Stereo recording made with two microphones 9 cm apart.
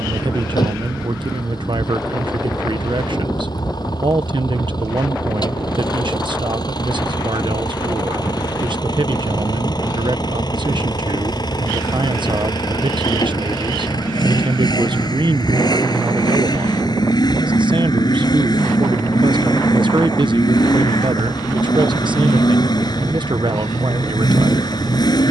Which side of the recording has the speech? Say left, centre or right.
right.